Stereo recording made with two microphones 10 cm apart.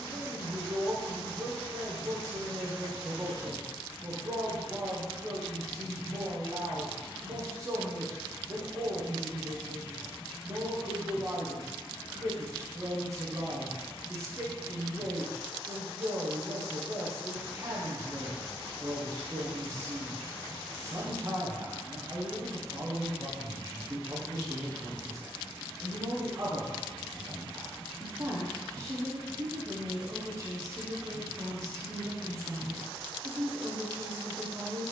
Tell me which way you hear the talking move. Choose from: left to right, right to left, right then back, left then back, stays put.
stays put.